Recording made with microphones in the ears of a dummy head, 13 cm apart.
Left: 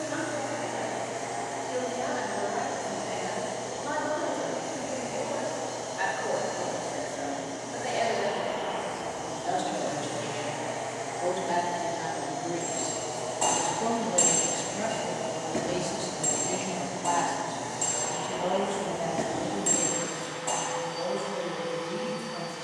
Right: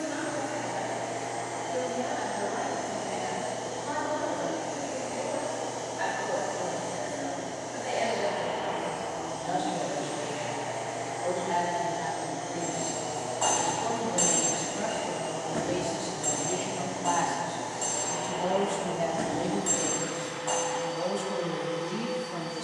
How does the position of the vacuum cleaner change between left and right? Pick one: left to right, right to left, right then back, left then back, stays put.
stays put.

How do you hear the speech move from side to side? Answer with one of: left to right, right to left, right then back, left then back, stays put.
left to right.